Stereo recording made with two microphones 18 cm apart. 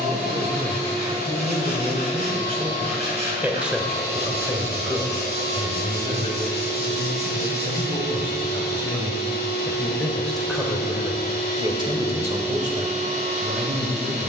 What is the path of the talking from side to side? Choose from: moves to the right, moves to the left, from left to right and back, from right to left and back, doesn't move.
from right to left and back.